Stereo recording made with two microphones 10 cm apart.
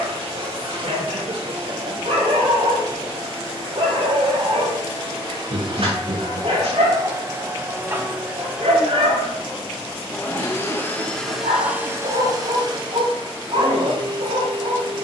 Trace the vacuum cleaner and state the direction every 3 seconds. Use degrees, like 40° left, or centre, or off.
60° right, 50° right, 30° right, centre, 50° right.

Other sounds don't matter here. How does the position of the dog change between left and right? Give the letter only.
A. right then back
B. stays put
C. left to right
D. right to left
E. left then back
B.